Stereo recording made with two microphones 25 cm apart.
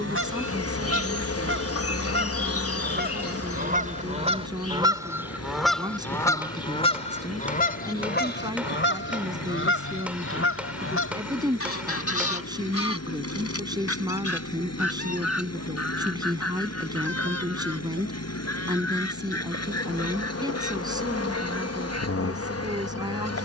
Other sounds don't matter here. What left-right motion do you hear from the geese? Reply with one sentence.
In this clip you hear the geese move from right to left.